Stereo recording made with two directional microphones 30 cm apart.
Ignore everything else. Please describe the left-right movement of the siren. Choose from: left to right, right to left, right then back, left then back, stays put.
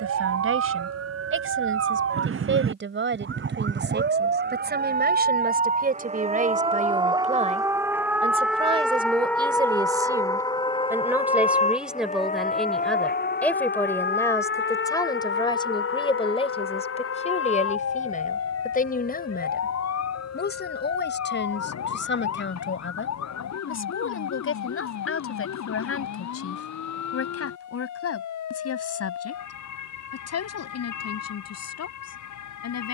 right to left.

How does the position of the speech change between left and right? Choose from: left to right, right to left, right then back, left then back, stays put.
right to left.